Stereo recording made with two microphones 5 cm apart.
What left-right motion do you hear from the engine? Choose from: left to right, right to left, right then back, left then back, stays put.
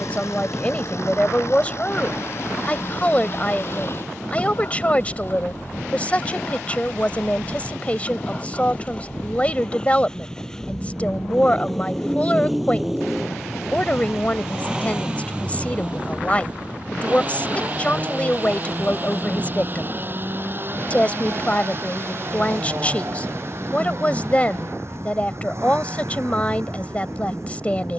left to right.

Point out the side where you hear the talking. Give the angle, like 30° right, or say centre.
20° left.